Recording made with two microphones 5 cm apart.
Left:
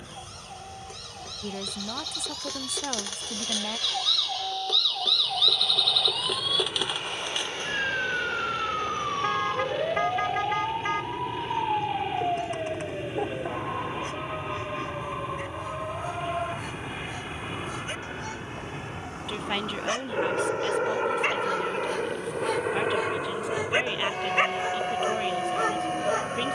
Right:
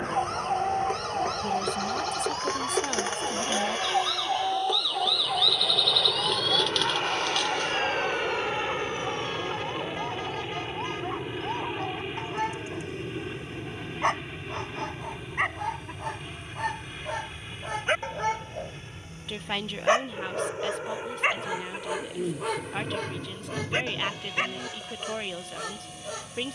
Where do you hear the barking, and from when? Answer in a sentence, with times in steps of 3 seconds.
You can hear the barking on the right from 0 s, in the centre from 21 s and on the left from 24 s.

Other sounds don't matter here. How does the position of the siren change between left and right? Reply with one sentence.
In this clip you hear the siren go from the right side to the left.